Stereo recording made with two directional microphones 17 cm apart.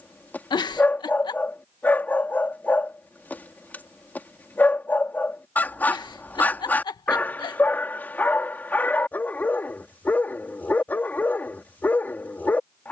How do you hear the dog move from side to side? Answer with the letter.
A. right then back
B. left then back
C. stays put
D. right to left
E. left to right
C.